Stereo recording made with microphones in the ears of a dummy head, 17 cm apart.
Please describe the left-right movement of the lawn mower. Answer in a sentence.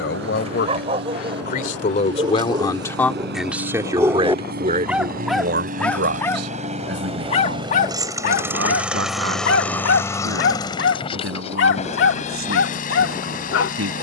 You can hear the lawn mower move to the left.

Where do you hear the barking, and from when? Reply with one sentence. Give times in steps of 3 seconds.
You can hear the barking on the right from 0 s, in the centre from 3 s and on the left from 6 s.